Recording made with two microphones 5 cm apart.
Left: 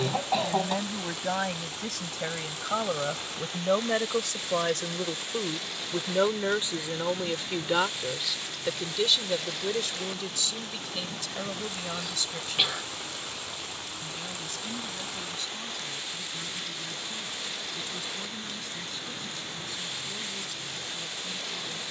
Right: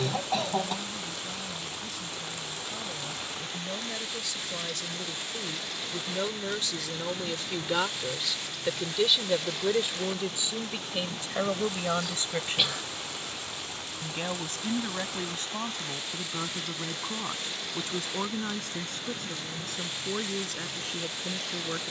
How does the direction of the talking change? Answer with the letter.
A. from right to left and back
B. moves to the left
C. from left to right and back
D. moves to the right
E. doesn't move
D.